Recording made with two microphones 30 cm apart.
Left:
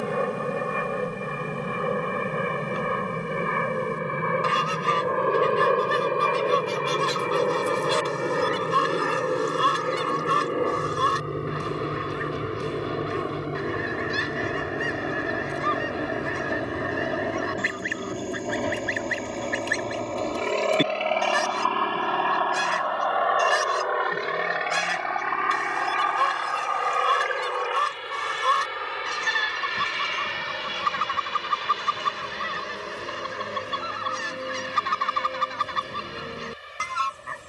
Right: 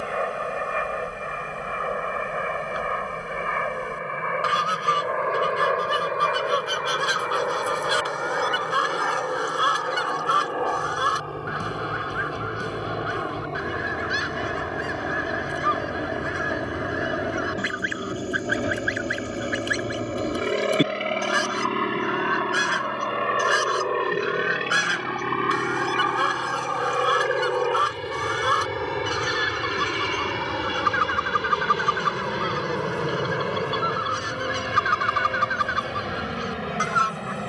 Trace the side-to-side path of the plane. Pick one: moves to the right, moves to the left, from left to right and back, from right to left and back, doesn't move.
moves to the right.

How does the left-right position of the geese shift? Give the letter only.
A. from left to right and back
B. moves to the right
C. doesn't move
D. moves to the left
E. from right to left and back
C.